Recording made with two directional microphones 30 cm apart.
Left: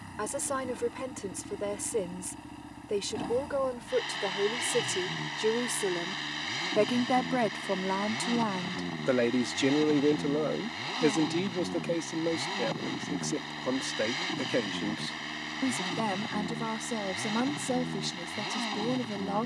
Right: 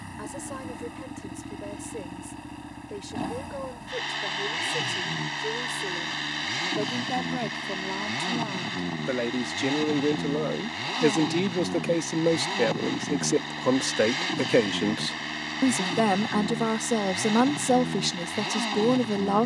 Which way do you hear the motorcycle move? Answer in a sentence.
You can hear the motorcycle stay put.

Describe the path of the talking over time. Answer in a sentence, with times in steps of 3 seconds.
You can hear the talking on the left from 0 s, in the centre from 9 s and on the right from 12 s.